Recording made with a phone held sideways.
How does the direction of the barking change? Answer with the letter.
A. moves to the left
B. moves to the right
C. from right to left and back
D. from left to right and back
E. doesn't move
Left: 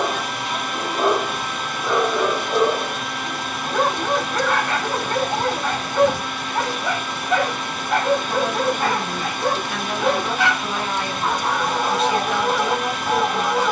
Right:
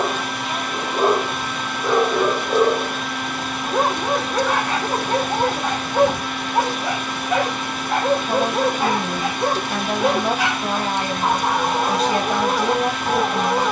E.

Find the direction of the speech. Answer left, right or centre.
right.